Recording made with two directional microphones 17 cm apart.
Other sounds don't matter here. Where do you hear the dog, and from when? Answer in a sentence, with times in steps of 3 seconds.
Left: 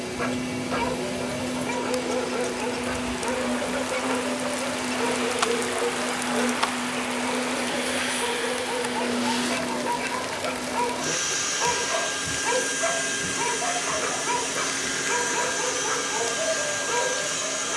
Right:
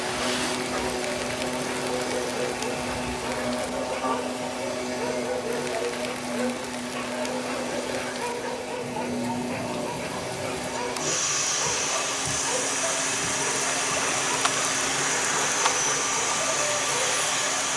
You can hear the dog on the left from 0 s, in the centre from 3 s and on the left from 9 s.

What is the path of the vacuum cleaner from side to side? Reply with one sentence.
You can hear the vacuum cleaner stay put.